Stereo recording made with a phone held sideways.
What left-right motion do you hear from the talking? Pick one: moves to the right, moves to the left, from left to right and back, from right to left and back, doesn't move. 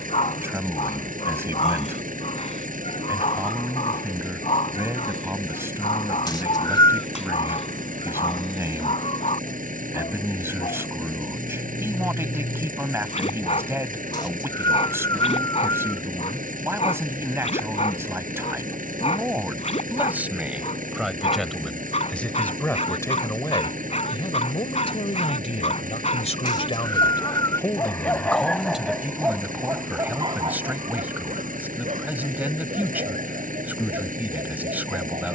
from right to left and back.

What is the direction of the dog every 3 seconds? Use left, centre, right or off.
left, left, left, left, left, left, left, left, left, centre, right, right.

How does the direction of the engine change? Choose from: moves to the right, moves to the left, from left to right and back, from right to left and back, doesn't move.
doesn't move.